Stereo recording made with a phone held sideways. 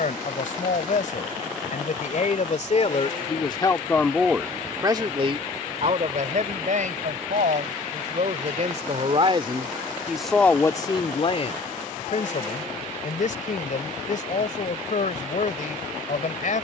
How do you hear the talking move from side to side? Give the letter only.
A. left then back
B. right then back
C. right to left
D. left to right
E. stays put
B.